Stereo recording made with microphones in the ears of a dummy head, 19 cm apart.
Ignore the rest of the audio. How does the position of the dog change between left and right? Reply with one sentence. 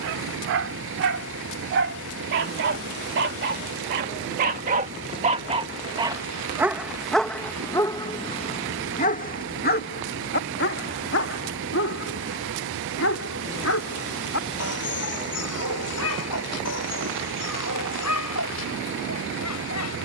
You can hear the dog move from right to left.